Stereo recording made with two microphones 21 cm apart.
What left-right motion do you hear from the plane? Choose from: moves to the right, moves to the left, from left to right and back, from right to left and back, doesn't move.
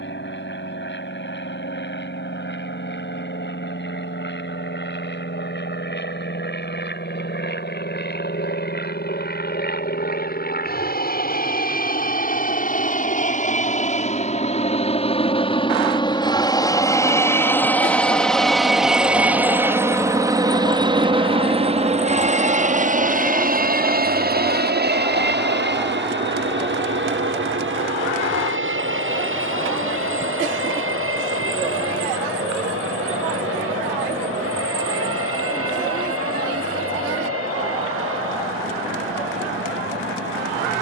moves to the right.